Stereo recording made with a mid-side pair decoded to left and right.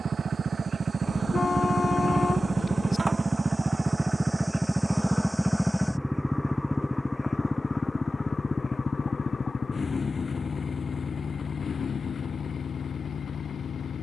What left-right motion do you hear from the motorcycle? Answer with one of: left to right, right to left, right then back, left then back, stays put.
right to left.